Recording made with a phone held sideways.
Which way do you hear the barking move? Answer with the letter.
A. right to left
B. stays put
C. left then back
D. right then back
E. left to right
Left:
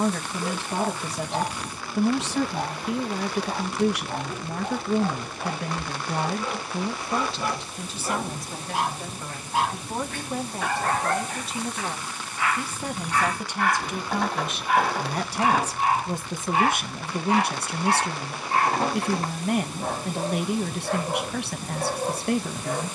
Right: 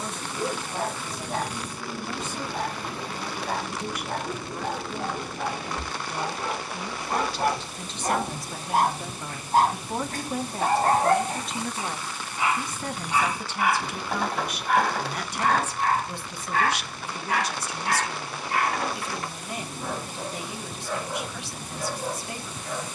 A.